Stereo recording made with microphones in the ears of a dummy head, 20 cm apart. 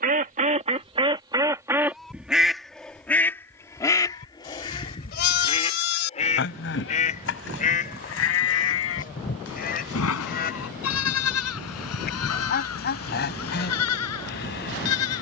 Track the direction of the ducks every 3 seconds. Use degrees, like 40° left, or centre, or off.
20° right, 20° left, 40° left, 40° left, 50° left.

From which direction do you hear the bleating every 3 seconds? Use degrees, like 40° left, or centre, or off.
10° right, 40° left, 60° left, 70° left, 80° left.